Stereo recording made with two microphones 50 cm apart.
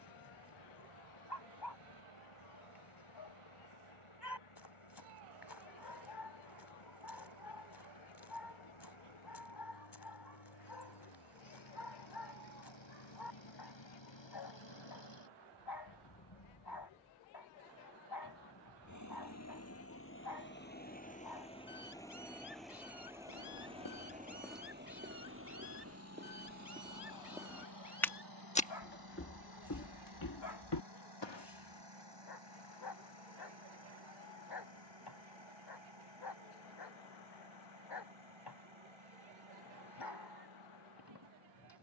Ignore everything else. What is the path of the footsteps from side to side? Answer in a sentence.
In this clip you hear the footsteps move from left to right and back again.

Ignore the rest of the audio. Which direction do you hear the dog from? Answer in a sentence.
You can hear the dog on the left.